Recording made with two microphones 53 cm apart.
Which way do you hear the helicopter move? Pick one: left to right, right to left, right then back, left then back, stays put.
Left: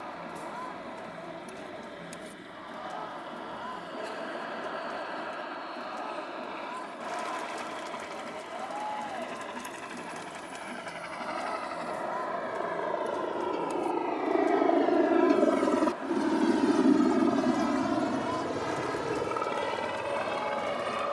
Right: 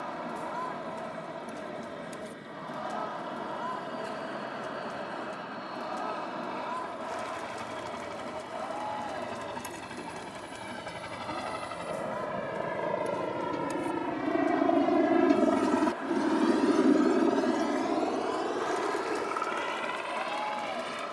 right to left.